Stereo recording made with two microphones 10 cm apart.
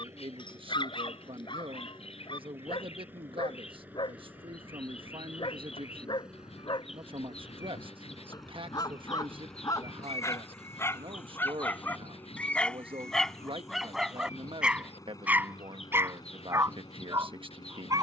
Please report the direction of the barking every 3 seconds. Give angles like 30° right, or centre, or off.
50° left, 50° left, 40° left, 30° left, centre, 20° right.